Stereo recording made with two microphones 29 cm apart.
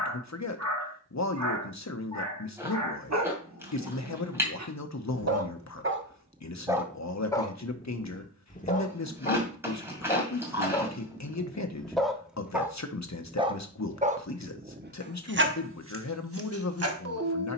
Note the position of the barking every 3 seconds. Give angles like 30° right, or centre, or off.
70° right, 60° right, 10° left, 10° left, 20° right, 50° right.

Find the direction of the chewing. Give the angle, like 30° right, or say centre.
10° right.